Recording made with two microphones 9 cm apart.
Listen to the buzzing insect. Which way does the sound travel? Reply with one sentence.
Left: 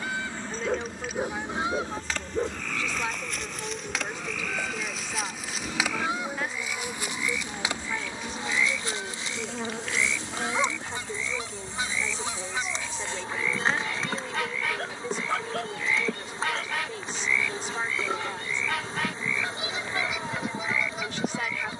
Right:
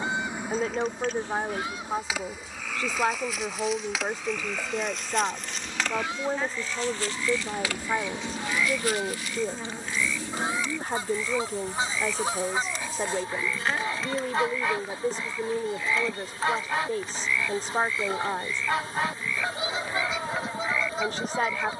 You can hear the buzzing insect move to the left.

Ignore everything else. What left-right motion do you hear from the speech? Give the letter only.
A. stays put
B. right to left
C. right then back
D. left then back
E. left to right
A.